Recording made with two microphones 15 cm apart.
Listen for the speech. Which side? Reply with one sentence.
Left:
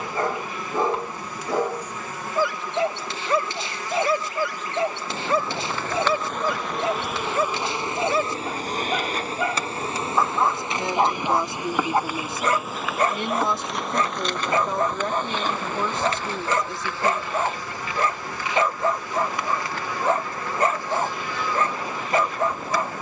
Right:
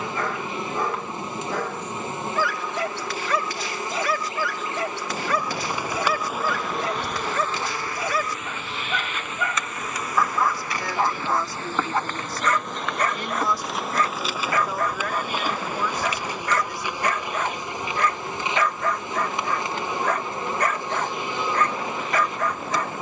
In this clip you hear the speech on the left.